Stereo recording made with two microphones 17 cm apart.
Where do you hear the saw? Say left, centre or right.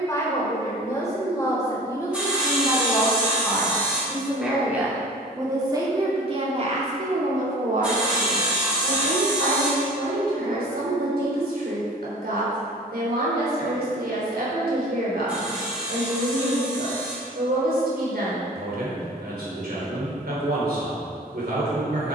centre.